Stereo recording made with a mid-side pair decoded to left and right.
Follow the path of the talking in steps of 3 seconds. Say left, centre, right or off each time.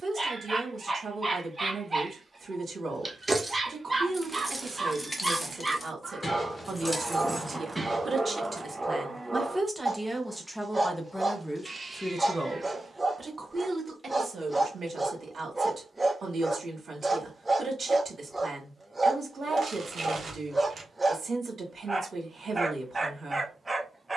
right, right, right, centre, right, right, right, right.